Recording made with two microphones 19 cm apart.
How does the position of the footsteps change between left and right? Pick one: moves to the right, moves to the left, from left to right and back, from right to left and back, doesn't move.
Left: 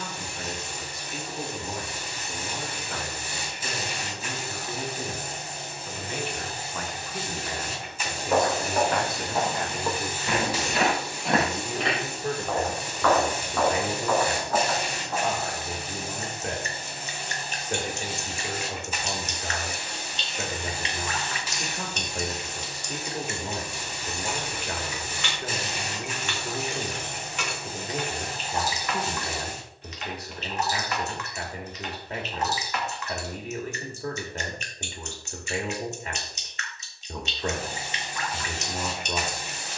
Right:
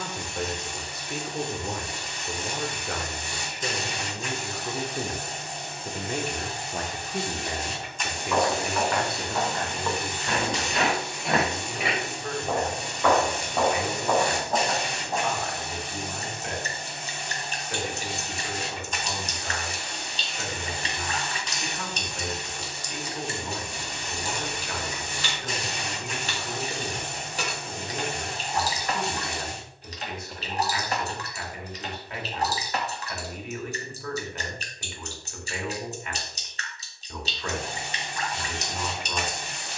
moves to the right.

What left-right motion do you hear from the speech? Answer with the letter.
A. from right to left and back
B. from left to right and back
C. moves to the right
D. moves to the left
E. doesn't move
D.